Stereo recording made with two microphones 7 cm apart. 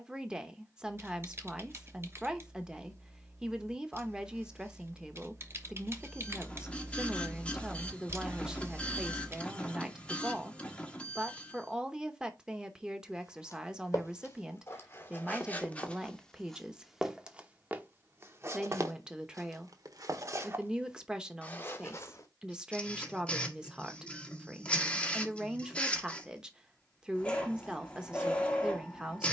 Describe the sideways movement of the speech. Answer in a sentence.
In this clip you hear the speech stay in one place.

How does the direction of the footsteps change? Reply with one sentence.
In this clip you hear the footsteps move from left to right and back again.